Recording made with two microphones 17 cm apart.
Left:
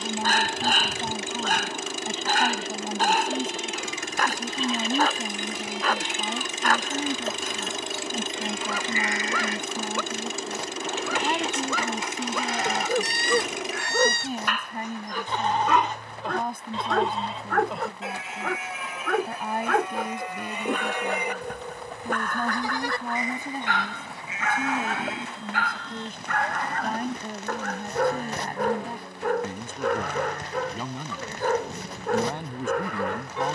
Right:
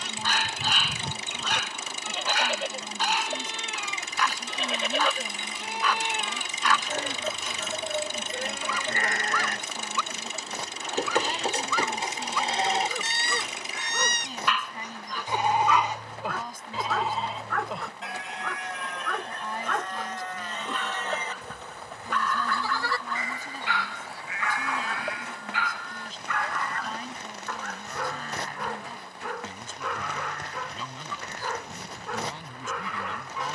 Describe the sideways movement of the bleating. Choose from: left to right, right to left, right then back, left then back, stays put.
right to left.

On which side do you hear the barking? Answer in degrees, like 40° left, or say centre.
50° left.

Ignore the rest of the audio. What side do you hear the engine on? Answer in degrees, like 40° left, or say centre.
70° left.